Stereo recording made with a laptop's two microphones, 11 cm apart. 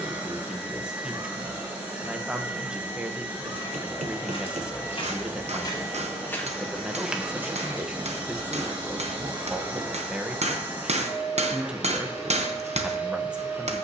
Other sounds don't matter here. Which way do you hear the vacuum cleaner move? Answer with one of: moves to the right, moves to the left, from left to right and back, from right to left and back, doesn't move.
doesn't move.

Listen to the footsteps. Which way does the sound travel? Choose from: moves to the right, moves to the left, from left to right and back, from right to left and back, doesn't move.
moves to the right.